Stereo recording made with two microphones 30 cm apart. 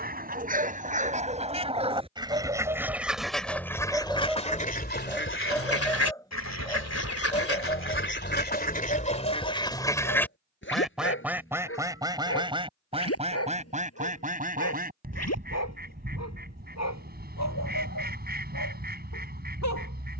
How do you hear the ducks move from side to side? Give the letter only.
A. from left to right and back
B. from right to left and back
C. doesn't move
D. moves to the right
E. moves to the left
B.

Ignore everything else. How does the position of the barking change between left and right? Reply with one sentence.
In this clip you hear the barking go from the right side to the left.